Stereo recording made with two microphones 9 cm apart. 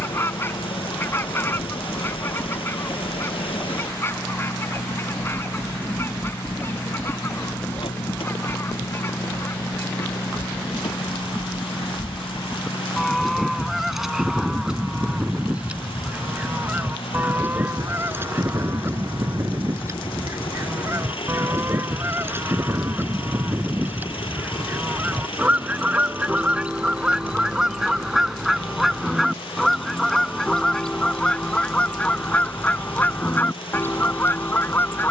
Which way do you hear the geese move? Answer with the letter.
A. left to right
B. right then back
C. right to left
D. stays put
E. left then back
B.